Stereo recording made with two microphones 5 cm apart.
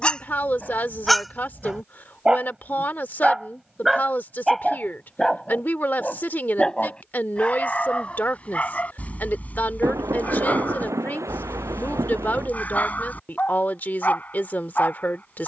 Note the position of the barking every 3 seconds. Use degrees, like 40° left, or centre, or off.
centre, centre, 20° left, 30° left, 30° left.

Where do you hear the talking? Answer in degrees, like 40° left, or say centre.
40° left.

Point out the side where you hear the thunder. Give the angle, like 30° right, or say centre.
80° right.